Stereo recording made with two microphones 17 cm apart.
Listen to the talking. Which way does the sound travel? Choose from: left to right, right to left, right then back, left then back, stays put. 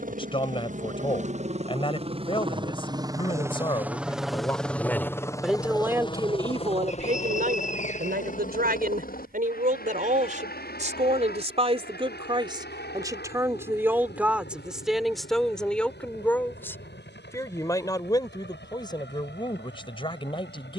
right then back.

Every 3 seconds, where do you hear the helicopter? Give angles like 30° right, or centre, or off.
40° right, centre, 40° left, 60° left, 70° left, 70° left, 80° left.